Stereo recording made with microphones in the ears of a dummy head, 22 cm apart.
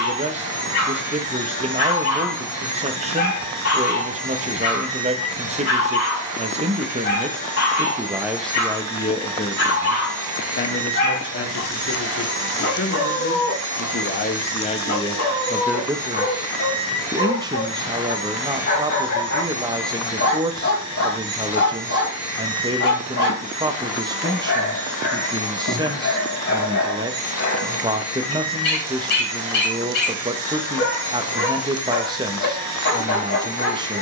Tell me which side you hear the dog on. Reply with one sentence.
You can hear the dog on the left.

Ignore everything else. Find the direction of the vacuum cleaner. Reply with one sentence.
In this clip you hear the vacuum cleaner on the right.